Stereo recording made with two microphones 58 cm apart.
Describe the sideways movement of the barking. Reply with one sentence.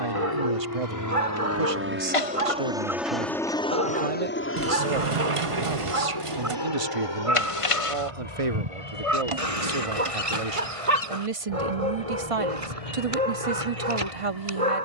In this clip you hear the barking stay put.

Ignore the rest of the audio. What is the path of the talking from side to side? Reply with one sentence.
You can hear the talking stay in one place.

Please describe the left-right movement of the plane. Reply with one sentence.
You can hear the plane go from the right side to the left.